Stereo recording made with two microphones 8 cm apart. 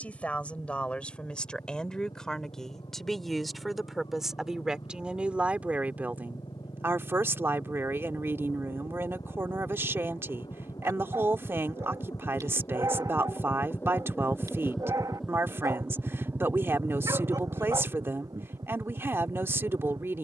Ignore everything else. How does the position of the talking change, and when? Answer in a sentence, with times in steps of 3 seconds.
In this clip you hear the talking in the centre from 0 s and on the right from 6 s.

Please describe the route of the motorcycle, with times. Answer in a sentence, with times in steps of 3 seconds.
In this clip you hear the motorcycle on the left from 0 s and on the right from 15 s.